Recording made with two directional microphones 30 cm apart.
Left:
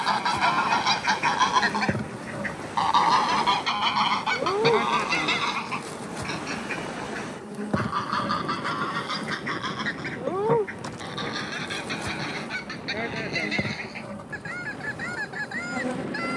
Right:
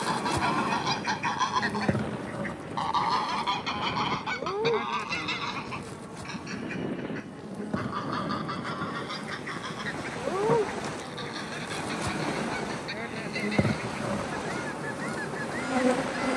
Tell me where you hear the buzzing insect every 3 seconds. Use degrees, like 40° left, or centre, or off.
10° right, 30° left, 30° left, 10° left, 20° right, 30° right.